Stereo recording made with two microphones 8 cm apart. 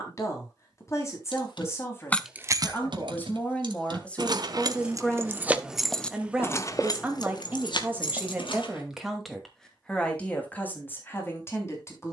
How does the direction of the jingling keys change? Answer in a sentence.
In this clip you hear the jingling keys move from left to right and back again.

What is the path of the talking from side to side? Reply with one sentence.
In this clip you hear the talking move from left to right and back again.